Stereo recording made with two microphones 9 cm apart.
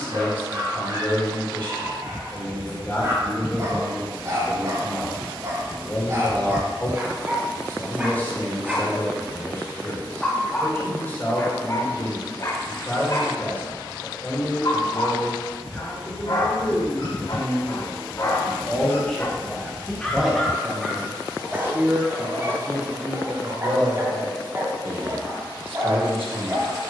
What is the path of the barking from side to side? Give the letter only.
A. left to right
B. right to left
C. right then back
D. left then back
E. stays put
D.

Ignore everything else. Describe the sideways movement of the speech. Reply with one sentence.
You can hear the speech go from the left side to the right.